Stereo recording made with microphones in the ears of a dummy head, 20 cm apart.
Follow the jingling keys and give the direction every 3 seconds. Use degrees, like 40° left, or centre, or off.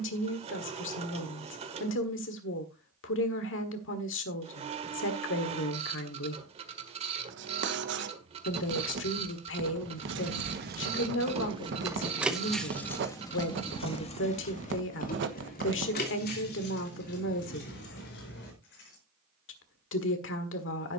off, off, off, 40° right, 20° left, 40° left, 50° left.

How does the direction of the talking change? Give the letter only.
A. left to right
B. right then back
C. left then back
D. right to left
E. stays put
E.